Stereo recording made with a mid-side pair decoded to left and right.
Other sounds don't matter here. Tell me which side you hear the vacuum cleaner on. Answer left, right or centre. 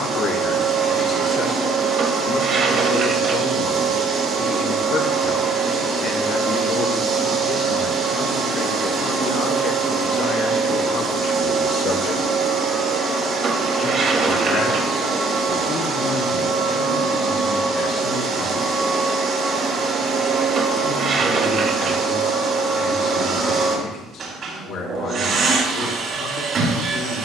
right.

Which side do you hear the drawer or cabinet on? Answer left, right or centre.
right.